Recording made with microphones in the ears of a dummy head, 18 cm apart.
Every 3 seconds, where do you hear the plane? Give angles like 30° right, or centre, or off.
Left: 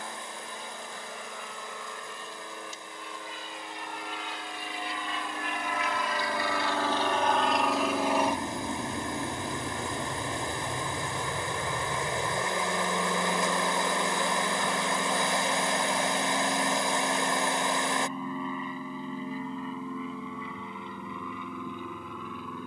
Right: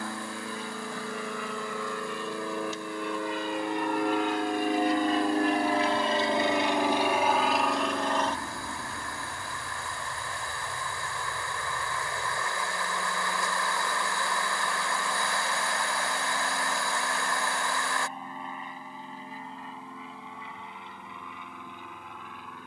70° right, 50° right, centre, 40° left, 60° left, 60° left, 70° left, 70° left.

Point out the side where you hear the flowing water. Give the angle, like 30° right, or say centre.
20° left.